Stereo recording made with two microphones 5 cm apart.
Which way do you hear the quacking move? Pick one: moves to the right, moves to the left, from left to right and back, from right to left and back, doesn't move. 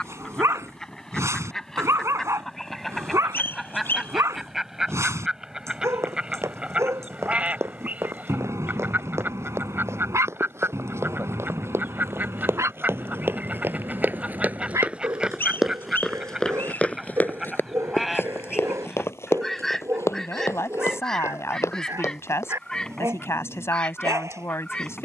from left to right and back.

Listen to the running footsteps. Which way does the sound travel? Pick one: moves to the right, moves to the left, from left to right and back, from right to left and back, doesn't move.
moves to the left.